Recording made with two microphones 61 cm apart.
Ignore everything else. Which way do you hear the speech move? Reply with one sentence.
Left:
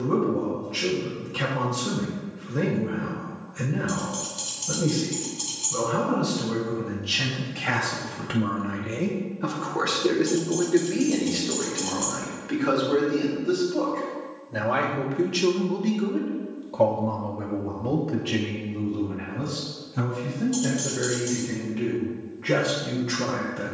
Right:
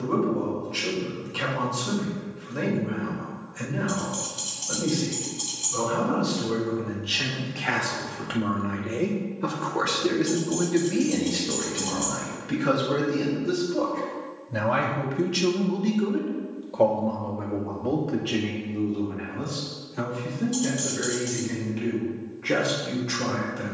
You can hear the speech move from left to right and back again.